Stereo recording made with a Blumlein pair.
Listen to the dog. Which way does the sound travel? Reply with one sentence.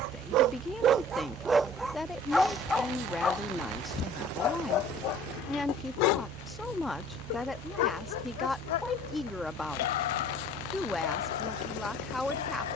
In this clip you hear the dog go from the right side to the left.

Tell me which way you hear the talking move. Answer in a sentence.
You can hear the talking stay put.